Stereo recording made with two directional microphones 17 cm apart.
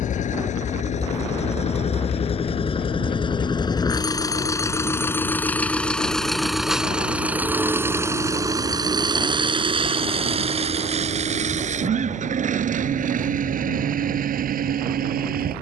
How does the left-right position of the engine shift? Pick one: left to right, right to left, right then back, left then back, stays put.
left to right.